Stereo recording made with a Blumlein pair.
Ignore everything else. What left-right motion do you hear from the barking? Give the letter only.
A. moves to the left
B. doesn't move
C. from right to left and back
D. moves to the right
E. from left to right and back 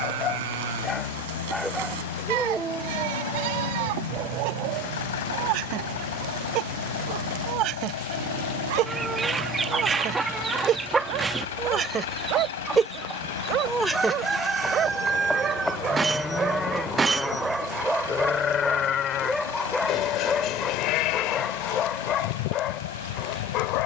E.